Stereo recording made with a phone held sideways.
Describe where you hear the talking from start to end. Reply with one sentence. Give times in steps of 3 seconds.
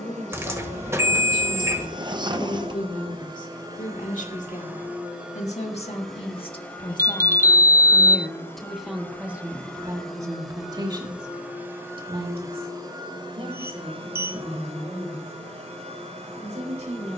In this clip you hear the talking on the left from 0 s and on the right from 9 s.